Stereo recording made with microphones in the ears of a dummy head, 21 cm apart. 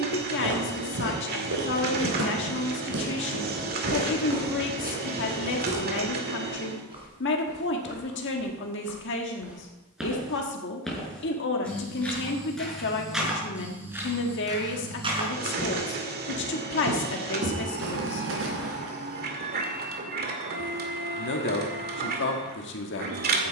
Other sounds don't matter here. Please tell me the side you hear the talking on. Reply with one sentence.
You can hear the talking on the left.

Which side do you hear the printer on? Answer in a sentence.
In this clip you hear the printer on the right.